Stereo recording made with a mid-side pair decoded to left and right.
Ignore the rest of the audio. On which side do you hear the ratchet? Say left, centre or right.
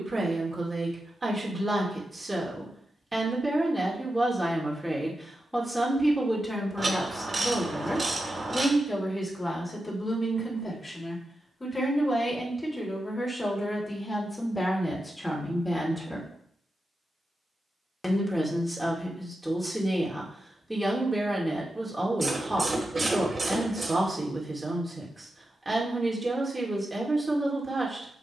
right.